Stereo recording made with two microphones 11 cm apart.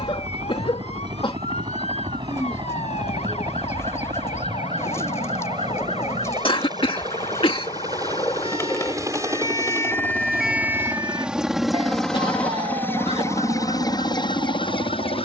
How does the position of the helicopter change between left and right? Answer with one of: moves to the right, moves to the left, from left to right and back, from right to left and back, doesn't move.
moves to the left.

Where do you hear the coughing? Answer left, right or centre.
left.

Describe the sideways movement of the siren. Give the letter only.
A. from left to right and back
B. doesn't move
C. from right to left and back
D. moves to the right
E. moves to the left
D.